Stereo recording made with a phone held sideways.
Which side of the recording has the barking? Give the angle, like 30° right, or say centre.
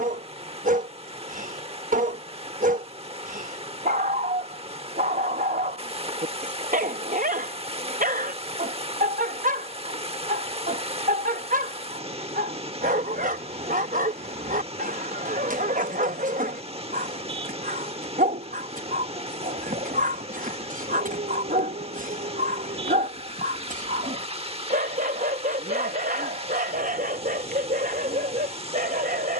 50° right.